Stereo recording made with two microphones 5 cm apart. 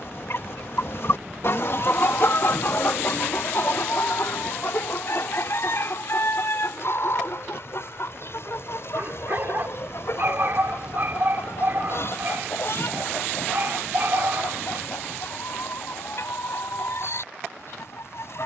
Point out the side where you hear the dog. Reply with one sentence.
In this clip you hear the dog on the right.